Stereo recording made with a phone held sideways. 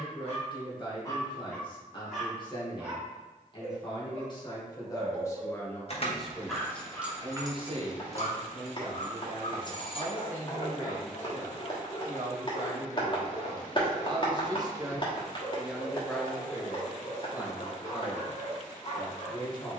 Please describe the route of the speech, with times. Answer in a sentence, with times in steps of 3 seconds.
You can hear the speech on the left from 0 s, on the right from 6 s, in the centre from 15 s and on the left from 18 s.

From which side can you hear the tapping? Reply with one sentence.
You can hear the tapping on the left.